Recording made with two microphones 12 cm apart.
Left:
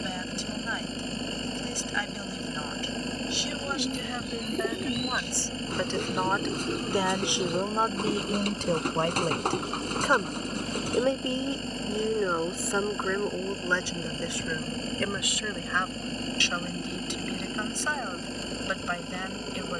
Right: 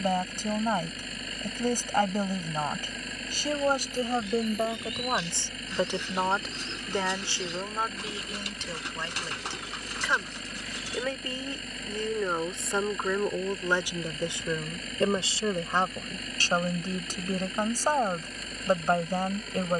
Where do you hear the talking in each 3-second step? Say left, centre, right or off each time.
right, right, left, left, centre, right, right.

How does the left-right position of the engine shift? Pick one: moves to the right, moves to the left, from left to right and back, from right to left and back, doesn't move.
doesn't move.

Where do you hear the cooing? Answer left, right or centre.
left.